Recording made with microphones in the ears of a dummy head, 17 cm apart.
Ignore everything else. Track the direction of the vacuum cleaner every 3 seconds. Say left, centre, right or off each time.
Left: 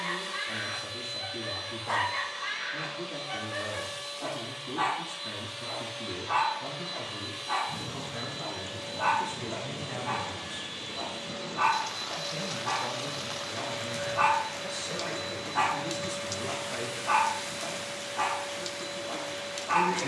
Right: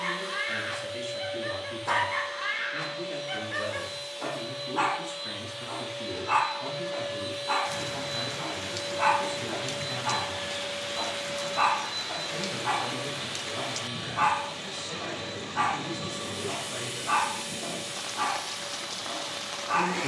left, left, centre, right, right, right, right.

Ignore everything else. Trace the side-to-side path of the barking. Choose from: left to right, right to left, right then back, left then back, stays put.
right to left.